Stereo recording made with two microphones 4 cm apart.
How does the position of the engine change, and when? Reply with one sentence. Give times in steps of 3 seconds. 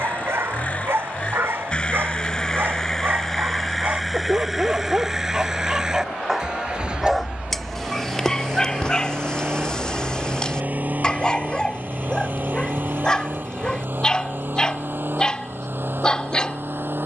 In this clip you hear the engine on the left from 0 s, in the centre from 3 s and on the right from 6 s.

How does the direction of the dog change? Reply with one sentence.
In this clip you hear the dog travel towards the left.